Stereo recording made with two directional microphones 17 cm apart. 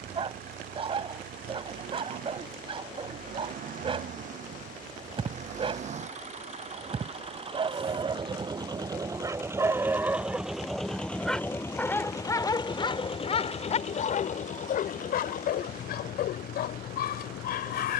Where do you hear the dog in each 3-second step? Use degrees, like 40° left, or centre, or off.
30° right, 30° right, 30° right, 10° right, 40° left, 70° left.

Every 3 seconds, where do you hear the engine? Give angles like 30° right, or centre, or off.
60° right, 50° right, 30° right, centre, 40° left, 60° left.